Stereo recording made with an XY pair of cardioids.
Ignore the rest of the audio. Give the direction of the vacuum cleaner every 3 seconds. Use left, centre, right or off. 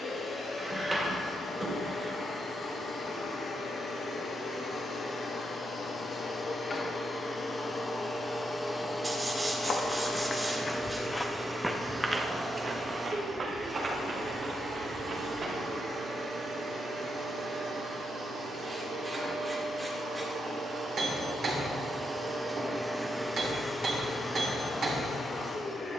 left, left, left, centre, right, right, right, right, left.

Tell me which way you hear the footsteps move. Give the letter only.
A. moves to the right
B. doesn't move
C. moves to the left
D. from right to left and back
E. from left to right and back
A.